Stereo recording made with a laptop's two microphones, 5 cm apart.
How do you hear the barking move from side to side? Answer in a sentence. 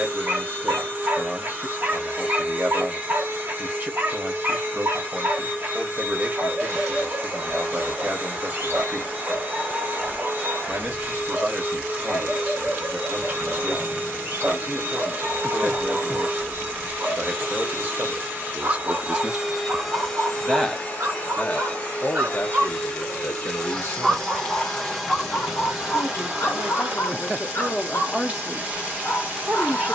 In this clip you hear the barking go from the right side to the left.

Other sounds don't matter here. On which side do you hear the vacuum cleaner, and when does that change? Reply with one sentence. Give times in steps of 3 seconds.
You can hear the vacuum cleaner on the right from 0 s, in the centre from 18 s, on the left from 21 s, in the centre from 24 s and on the right from 27 s.